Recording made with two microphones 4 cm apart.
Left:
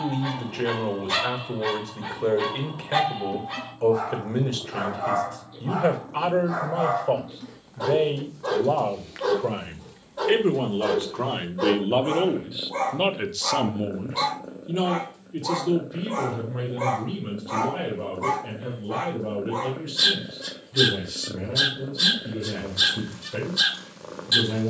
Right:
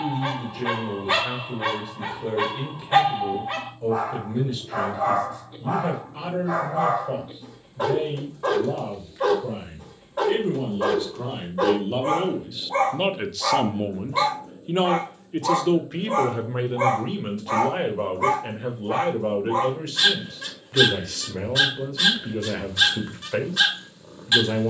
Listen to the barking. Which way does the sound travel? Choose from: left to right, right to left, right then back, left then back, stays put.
stays put.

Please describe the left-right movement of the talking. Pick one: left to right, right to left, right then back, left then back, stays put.
left to right.